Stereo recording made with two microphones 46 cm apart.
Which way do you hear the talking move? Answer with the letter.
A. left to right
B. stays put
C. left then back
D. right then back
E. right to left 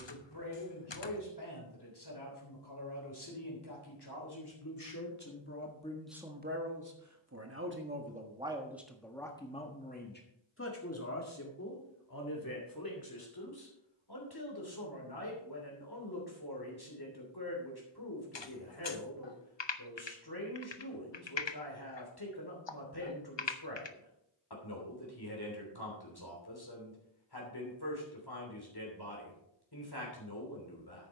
D.